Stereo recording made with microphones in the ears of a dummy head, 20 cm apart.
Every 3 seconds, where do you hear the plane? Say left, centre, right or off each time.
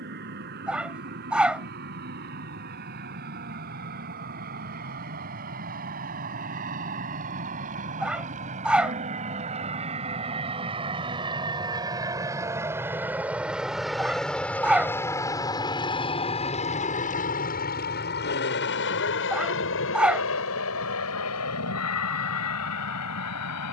right, right, right, right, centre, left, left, left.